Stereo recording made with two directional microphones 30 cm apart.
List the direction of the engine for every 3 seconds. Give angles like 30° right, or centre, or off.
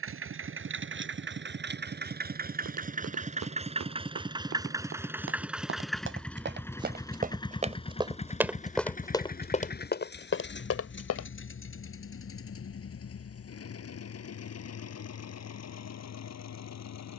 40° right, 10° right, 10° left, 40° left, 50° left, 60° left.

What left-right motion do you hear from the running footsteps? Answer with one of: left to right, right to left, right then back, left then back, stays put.
right to left.